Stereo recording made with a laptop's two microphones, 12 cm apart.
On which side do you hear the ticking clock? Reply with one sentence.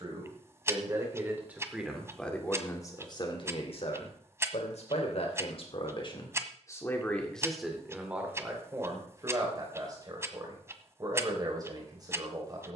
In this clip you hear the ticking clock on the right.